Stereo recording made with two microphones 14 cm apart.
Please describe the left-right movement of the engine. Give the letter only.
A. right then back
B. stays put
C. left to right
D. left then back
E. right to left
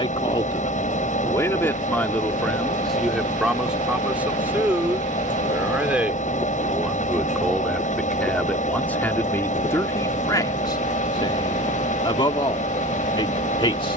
B.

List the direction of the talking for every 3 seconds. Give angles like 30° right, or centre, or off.
20° left, 10° right, centre, 20° left, 30° left.